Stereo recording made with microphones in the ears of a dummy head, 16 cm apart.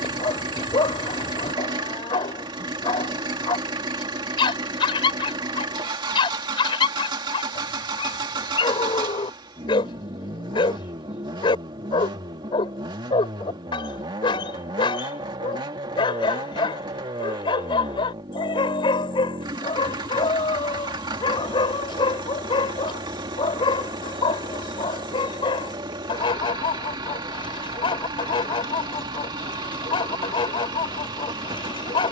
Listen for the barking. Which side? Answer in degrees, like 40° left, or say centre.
30° left.